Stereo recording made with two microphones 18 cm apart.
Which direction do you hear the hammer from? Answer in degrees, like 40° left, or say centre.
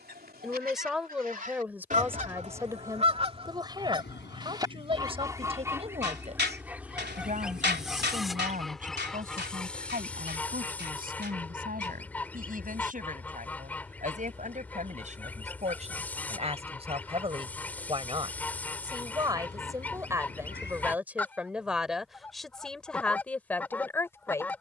70° right.